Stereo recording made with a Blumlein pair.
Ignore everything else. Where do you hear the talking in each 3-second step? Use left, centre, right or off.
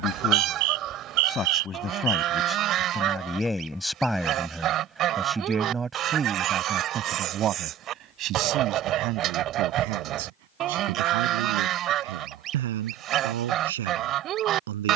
left, centre, right, right, right.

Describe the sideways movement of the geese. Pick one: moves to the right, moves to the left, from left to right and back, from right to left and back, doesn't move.
doesn't move.